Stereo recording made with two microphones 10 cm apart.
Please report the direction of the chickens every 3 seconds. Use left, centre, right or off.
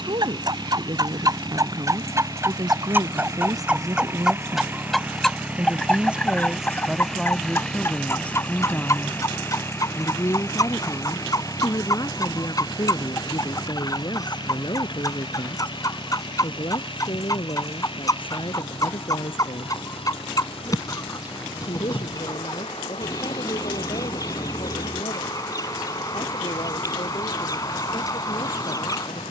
right, centre, left, left, left, left, left, left, left, left.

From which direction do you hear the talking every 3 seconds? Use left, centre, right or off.
right, right, centre, left, left, left, left, left, left, left.